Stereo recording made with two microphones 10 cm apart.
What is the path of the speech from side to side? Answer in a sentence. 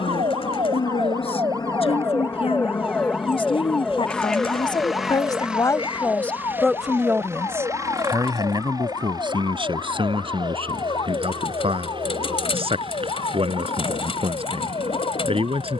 You can hear the speech go from the left side to the right.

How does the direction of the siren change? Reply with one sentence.
You can hear the siren move to the left.